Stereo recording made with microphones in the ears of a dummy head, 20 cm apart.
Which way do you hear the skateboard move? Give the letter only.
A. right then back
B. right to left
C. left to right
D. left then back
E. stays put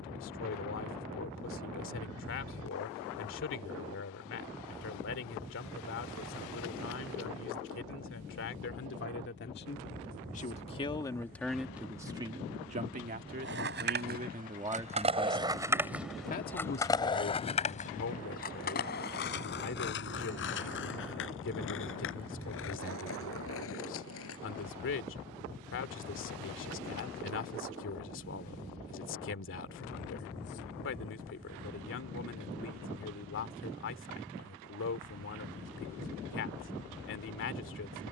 B.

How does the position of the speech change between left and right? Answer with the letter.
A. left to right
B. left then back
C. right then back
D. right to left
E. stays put
C.